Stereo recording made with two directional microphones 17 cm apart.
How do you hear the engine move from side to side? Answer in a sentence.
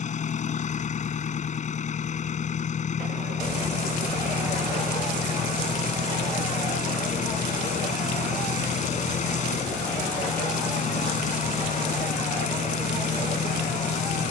In this clip you hear the engine stay put.